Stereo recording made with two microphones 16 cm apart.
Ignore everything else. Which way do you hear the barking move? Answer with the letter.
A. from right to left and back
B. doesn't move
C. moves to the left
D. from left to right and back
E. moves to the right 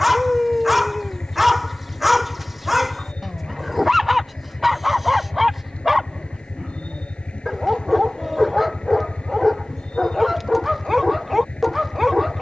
B.